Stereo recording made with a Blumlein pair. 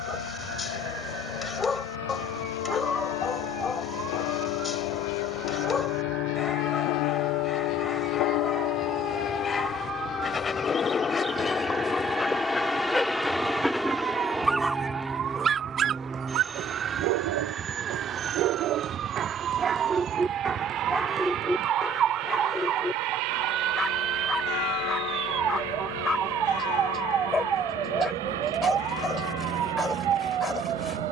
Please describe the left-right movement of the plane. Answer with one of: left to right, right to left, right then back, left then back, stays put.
left to right.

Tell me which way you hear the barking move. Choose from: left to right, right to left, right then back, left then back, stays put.
right then back.